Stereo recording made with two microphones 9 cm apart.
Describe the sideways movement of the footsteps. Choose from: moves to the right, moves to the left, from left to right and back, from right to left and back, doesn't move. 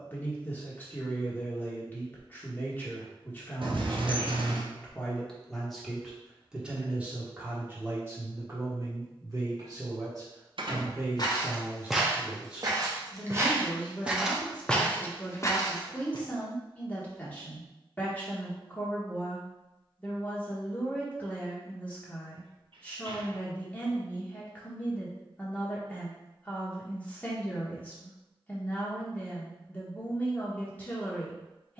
from left to right and back.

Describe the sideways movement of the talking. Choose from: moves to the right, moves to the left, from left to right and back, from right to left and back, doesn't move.
from left to right and back.